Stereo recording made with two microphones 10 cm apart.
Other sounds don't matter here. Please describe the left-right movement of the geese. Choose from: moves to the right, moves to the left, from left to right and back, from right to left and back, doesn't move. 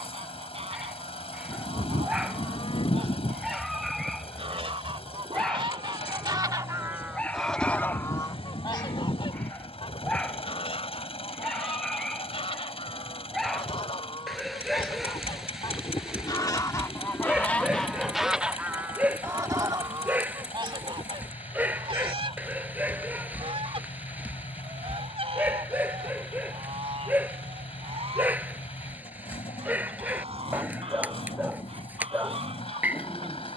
from right to left and back.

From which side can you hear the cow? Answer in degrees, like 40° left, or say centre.
60° left.